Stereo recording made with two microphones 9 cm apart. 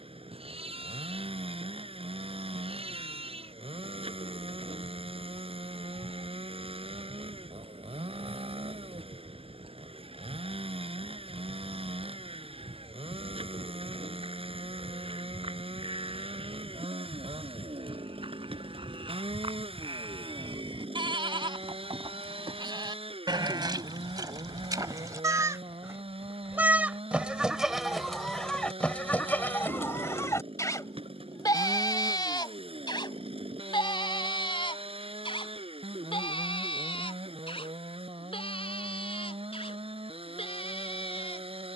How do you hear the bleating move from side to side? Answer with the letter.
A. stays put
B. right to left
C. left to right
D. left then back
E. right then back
B.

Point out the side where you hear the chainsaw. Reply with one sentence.
In this clip you hear the chainsaw on the right.